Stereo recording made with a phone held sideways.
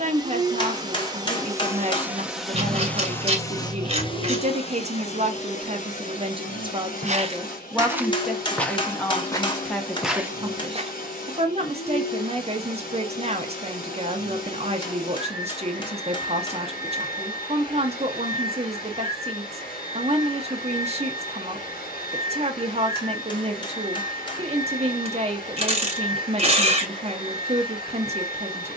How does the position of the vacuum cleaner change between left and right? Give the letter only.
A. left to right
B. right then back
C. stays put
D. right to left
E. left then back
D.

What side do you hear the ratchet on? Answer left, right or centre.
right.